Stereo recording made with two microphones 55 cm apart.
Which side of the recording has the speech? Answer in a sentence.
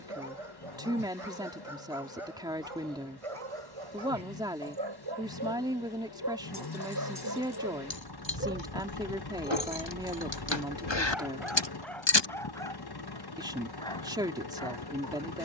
In this clip you hear the speech in the centre.